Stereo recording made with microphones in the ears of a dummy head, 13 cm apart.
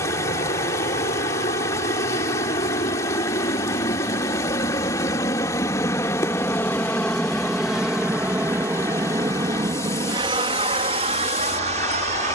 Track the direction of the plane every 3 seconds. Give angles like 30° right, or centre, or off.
50° left, 30° left, centre, 30° right.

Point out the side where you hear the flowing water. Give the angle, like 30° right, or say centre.
20° left.